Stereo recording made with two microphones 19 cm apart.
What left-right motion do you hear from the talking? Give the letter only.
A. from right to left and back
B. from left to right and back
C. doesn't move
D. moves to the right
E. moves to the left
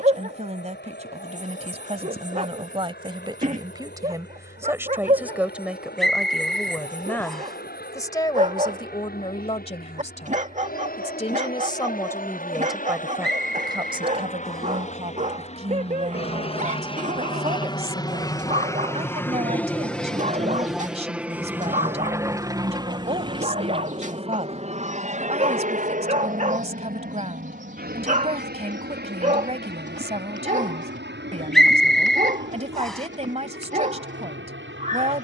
A.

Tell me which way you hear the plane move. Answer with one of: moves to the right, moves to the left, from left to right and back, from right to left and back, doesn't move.
moves to the right.